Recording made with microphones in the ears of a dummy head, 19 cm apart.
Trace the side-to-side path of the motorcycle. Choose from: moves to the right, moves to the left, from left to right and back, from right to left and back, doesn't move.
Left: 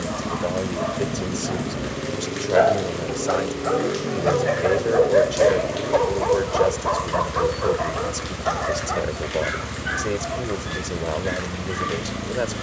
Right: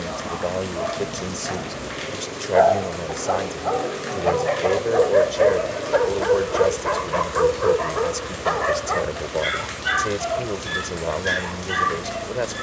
doesn't move.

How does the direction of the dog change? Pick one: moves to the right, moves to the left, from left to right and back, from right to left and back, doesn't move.
moves to the right.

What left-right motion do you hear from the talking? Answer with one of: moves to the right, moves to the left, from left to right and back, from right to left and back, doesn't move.
doesn't move.